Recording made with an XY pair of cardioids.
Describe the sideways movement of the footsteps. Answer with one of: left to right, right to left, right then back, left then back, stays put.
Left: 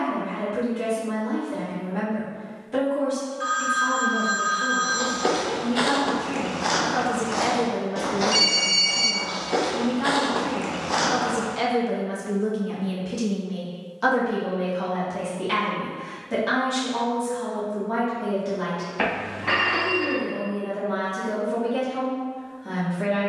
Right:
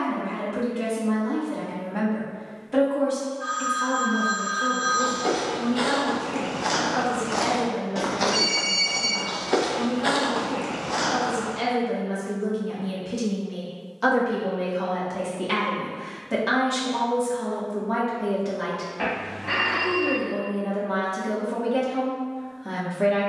right then back.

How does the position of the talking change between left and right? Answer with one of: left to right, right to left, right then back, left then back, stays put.
left then back.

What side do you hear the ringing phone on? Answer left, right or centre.
left.